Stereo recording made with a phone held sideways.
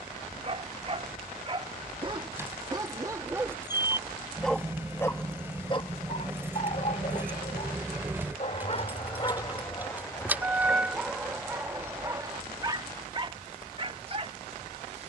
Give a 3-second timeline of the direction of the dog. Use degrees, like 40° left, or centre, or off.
30° right, centre, 50° left, 10° left, 30° right.